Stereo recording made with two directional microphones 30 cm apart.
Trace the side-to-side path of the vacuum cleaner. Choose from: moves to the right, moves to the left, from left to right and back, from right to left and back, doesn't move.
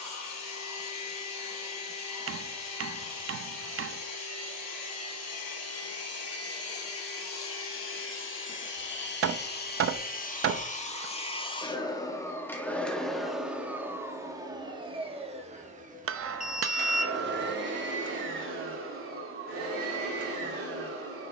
moves to the right.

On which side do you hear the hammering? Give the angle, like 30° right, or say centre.
50° right.